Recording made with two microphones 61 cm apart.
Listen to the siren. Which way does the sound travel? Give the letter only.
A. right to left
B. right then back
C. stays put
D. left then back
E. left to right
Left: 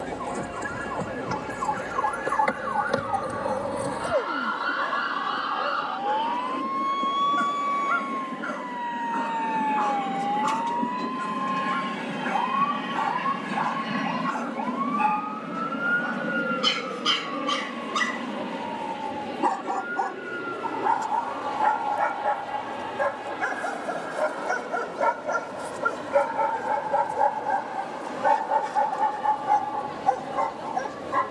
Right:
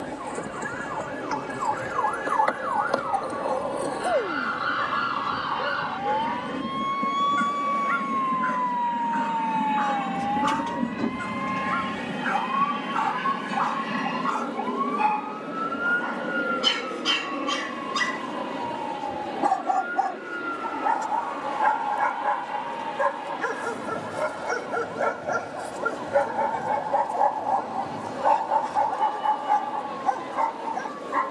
E.